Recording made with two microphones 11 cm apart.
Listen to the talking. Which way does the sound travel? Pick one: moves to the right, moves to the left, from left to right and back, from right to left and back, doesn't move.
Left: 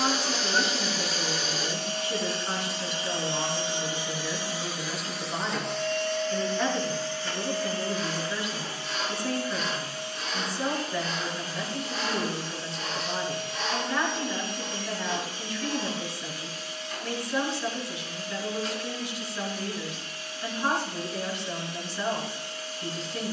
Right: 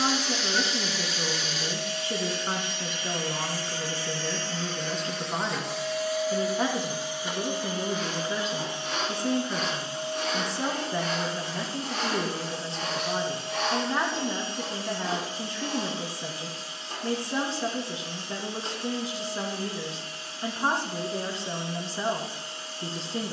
doesn't move.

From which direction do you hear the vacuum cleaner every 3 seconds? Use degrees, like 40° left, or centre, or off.
40° left, 10° left, 20° right, 30° right, 30° right, 30° right, 30° right, 30° right.